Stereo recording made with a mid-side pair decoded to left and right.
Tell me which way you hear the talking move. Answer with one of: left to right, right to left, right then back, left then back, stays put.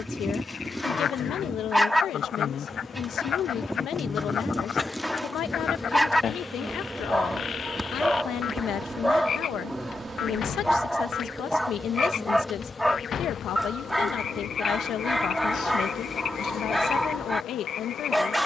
stays put.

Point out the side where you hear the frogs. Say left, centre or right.
left.